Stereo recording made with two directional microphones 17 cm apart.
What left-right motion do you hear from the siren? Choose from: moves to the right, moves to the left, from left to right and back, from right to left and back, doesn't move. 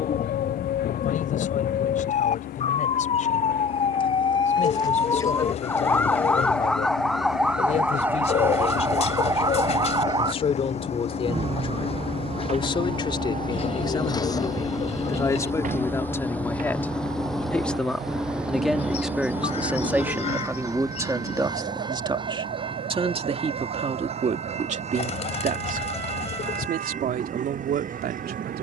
moves to the right.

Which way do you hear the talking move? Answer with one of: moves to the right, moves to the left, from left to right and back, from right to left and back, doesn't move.
moves to the right.